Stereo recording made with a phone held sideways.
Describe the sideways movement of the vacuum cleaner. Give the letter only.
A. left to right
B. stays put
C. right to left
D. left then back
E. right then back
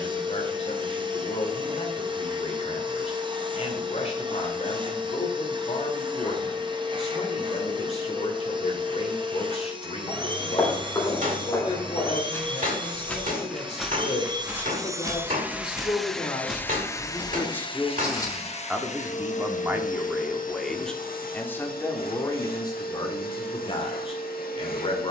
C.